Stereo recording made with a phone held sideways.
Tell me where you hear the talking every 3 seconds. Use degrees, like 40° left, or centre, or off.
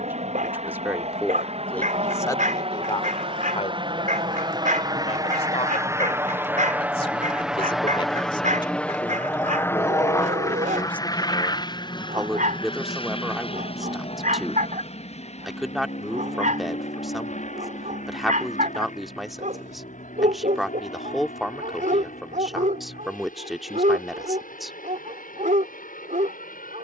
10° left, 50° left, 40° left, 10° left, centre, centre, centre, centre, centre.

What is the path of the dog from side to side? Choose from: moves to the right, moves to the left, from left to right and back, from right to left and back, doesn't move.
doesn't move.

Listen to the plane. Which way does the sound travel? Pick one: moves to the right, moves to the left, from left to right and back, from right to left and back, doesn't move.
moves to the left.